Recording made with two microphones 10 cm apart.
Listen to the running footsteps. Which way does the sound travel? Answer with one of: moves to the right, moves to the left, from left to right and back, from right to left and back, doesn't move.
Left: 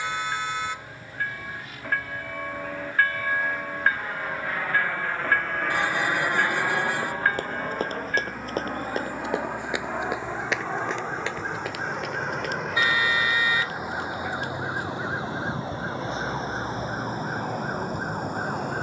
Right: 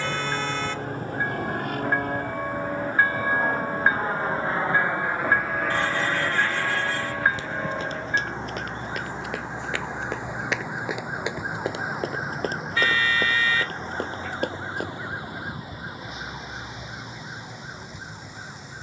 moves to the right.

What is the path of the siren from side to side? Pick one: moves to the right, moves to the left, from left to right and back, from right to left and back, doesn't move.
moves to the left.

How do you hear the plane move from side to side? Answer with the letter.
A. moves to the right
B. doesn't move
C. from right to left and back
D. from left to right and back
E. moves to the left
E.